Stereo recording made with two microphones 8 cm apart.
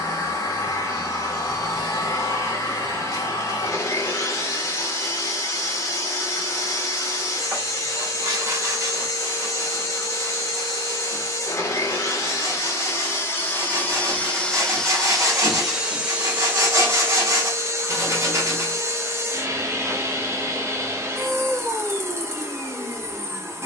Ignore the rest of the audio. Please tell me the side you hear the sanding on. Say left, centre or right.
right.